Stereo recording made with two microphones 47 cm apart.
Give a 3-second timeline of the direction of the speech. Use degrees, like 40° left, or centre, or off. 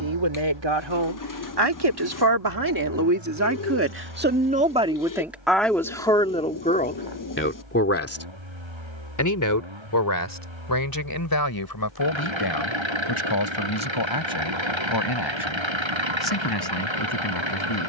60° right, 20° right, 20° left, 40° left, 50° left, 60° left.